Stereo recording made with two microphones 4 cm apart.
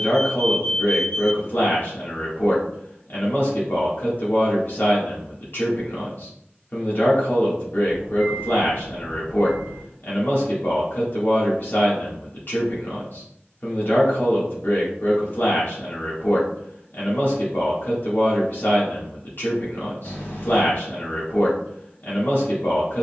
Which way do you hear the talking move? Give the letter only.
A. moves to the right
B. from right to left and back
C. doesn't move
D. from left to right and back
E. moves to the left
C.